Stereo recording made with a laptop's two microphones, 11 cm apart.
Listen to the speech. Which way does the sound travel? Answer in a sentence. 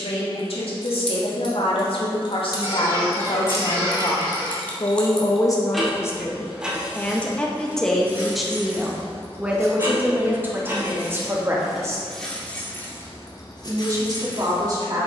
In this clip you hear the speech move to the right.